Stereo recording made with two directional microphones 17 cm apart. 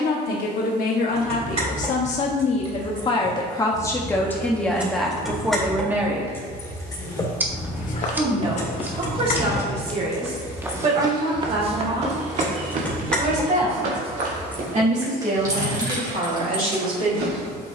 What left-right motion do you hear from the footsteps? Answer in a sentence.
You can hear the footsteps move to the right.